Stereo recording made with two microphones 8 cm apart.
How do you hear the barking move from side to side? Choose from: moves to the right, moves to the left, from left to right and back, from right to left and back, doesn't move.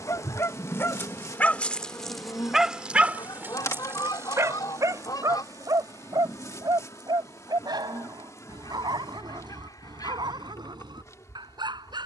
moves to the right.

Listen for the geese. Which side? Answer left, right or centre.
left.